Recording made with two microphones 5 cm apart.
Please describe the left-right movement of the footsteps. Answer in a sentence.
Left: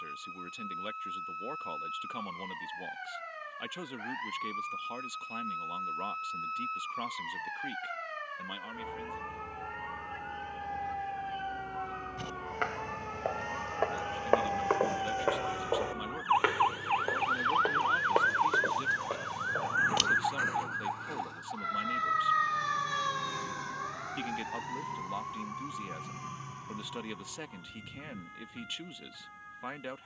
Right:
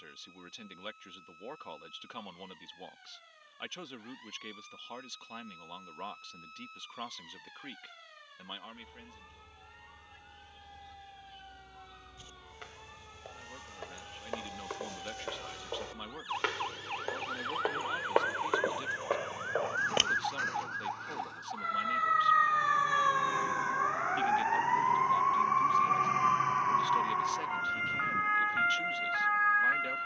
You can hear the footsteps move to the right.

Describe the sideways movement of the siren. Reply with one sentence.
You can hear the siren move from left to right.